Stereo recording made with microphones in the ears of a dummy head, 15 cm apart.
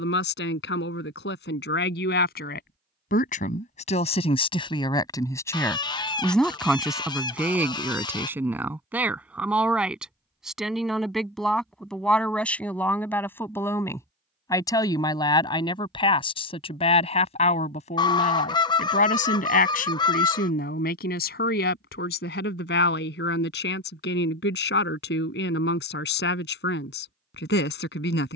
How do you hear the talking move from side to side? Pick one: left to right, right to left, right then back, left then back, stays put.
right then back.